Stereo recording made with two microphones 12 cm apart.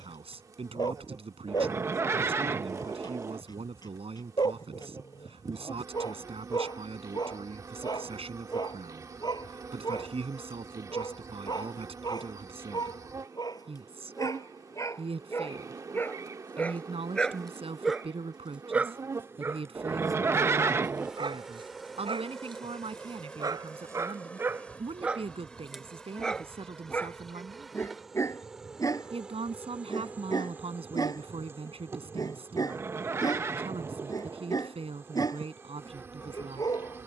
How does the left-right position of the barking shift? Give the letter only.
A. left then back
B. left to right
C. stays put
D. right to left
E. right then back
E.